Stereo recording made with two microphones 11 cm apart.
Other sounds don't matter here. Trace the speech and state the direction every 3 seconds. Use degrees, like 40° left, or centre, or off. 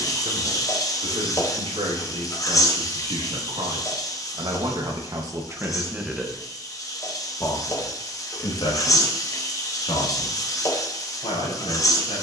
70° right, 40° right, 30° left, 60° left.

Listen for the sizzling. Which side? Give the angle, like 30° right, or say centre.
30° left.